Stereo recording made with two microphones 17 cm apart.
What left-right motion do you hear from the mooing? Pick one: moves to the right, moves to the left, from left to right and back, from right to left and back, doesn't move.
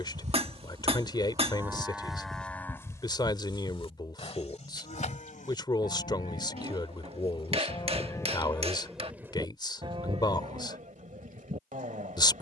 from right to left and back.